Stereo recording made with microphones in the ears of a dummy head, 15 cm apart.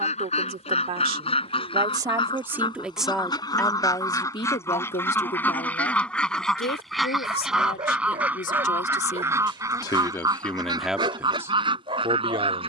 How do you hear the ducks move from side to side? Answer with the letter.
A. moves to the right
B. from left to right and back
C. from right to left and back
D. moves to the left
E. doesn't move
A.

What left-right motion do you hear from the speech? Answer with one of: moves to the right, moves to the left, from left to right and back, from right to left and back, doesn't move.
from right to left and back.